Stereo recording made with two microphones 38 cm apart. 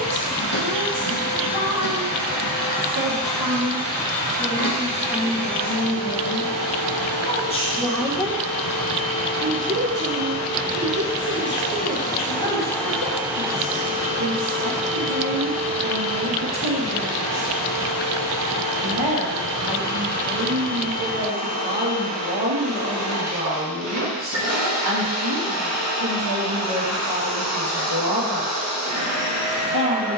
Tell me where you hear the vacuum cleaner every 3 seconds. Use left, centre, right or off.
left, left, left, left, centre, right, right, right, right, right.